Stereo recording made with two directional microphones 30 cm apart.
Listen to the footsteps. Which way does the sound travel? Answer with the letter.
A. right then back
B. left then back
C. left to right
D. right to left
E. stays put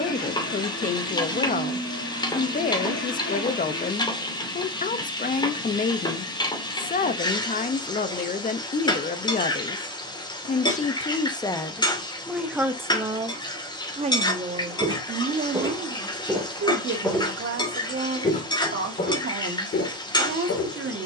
D.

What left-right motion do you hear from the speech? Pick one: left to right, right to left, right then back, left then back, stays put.
left to right.